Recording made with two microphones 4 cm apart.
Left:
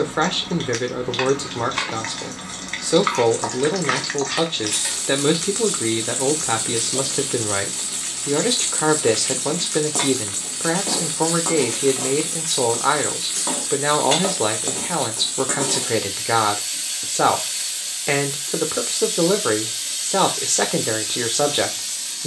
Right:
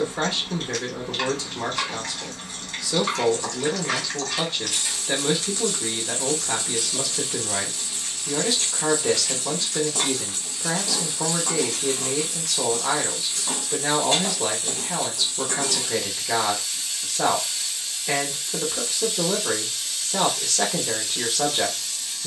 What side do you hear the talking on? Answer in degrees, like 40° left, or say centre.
50° left.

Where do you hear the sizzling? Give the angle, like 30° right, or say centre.
80° left.